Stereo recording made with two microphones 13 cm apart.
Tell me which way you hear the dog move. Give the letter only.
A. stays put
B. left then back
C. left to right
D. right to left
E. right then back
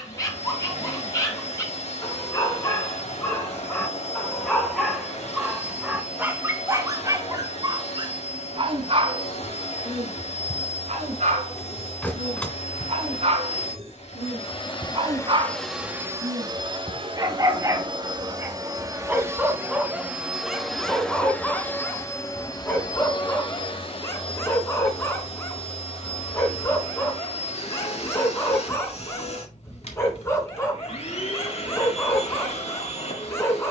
E.